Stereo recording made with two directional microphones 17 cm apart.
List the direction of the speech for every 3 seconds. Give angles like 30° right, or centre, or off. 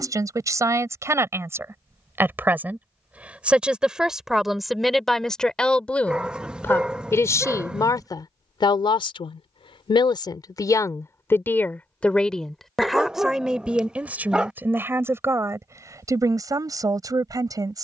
10° right, centre, 20° left, 20° left, centre, 20° right.